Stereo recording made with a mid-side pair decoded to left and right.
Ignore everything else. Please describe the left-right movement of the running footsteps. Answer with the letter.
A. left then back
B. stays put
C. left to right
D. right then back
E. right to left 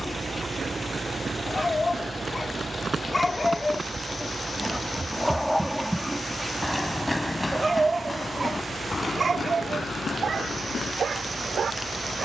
E.